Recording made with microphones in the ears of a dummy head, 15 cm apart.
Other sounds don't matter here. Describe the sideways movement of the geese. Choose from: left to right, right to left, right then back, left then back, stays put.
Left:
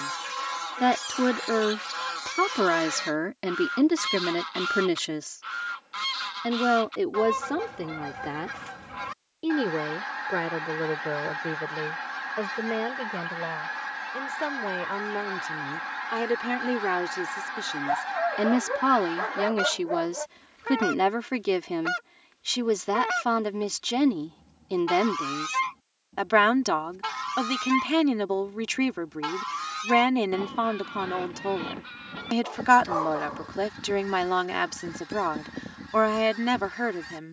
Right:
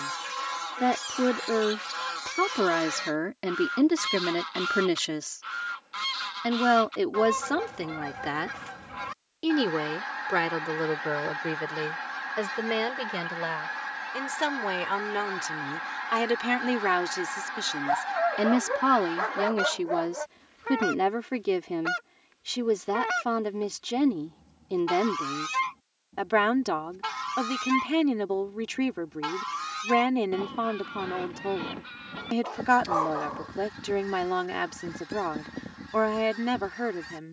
stays put.